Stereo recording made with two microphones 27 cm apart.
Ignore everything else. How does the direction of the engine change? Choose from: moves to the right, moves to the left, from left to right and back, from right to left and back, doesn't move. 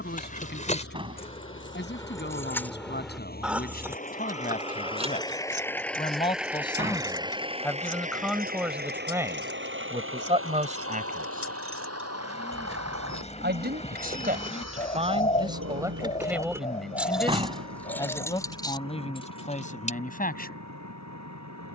moves to the right.